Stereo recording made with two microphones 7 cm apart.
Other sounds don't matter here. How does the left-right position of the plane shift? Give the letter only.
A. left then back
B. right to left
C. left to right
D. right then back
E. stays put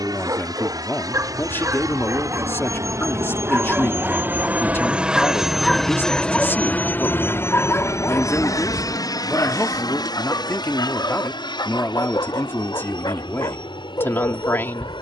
B.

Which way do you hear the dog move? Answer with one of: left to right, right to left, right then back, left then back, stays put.
right to left.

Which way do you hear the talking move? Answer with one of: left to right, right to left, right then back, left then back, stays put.
stays put.